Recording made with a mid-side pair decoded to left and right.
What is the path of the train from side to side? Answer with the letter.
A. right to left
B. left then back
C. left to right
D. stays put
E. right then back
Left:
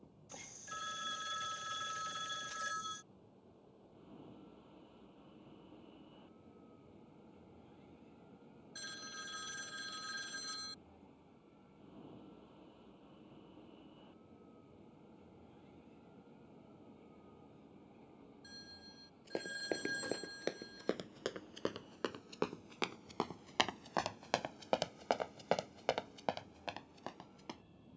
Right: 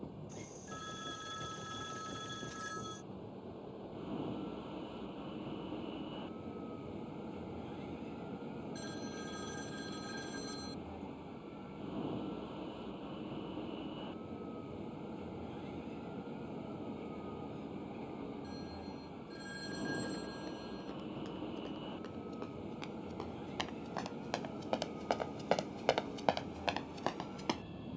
D.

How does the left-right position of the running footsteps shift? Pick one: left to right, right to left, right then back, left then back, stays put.
left to right.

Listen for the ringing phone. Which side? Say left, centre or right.
left.